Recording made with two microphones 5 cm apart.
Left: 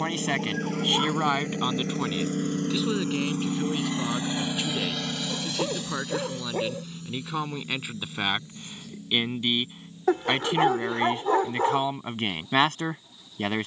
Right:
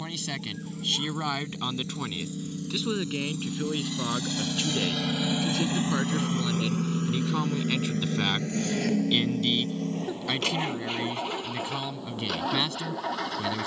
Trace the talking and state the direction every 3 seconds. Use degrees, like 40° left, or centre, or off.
20° left, centre, 10° left, 30° left, 50° left.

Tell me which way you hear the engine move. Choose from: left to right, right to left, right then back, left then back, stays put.
left to right.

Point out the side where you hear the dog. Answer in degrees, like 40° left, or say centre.
70° left.